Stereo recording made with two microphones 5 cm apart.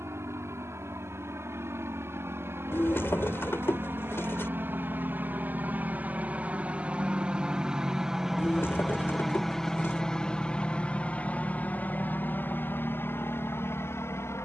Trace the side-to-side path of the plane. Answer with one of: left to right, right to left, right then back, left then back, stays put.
right to left.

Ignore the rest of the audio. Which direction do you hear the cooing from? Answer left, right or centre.
left.